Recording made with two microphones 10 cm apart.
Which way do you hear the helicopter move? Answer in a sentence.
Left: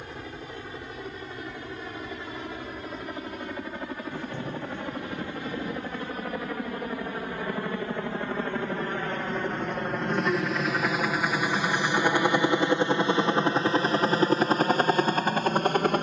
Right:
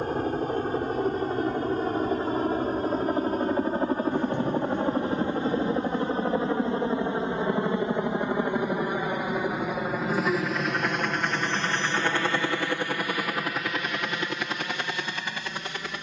You can hear the helicopter go from the right side to the left.